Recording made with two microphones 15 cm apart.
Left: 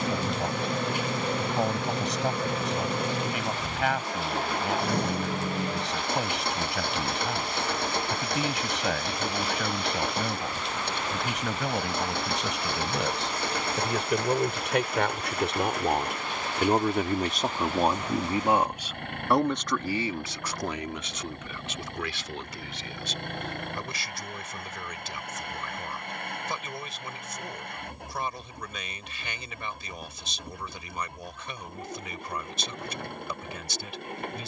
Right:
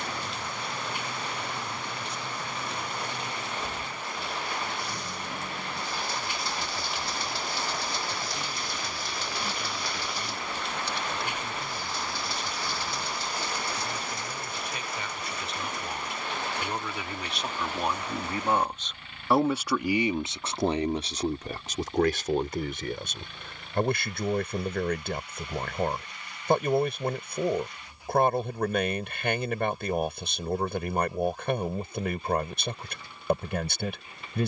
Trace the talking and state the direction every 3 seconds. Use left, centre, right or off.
left, left, left, left, left, left, centre, right, right, right, right, right.